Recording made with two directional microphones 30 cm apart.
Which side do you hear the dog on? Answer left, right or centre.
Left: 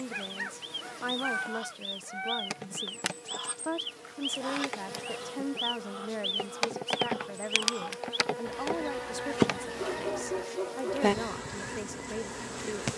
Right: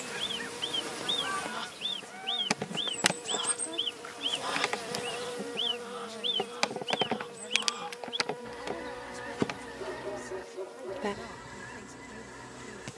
left.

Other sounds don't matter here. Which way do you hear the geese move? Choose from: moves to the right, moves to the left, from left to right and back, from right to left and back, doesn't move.
moves to the left.